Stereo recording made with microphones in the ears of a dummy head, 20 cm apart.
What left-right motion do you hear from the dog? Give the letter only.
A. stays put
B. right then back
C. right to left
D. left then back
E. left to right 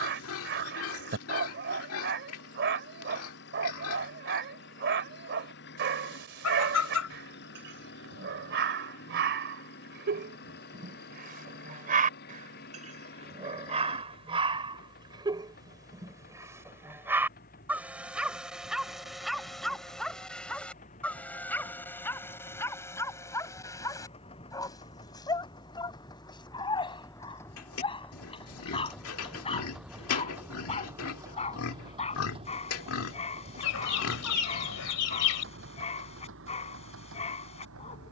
C.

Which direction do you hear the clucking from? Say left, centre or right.
left.